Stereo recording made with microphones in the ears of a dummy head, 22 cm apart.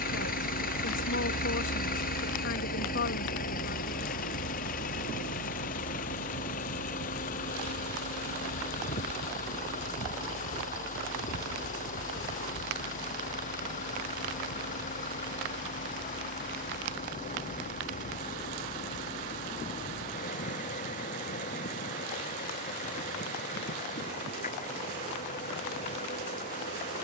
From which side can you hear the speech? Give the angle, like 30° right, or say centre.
50° left.